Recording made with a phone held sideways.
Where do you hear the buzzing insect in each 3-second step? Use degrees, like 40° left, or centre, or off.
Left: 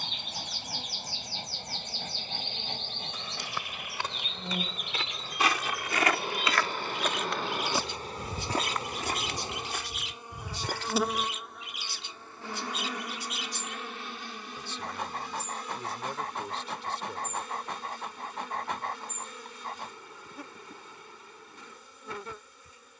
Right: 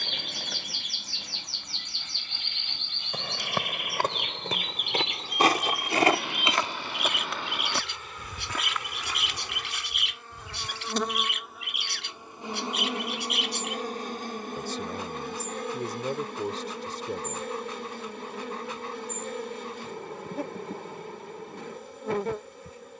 60° left, 50° left, 40° left, 10° left, 30° right, 60° right, 60° right, 60° right.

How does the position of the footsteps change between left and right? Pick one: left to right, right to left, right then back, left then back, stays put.
right to left.